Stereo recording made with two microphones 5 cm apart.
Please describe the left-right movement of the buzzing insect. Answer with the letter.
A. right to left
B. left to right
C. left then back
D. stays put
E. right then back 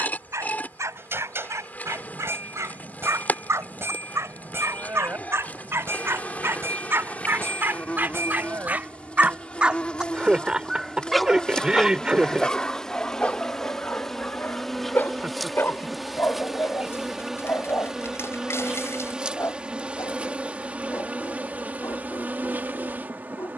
B.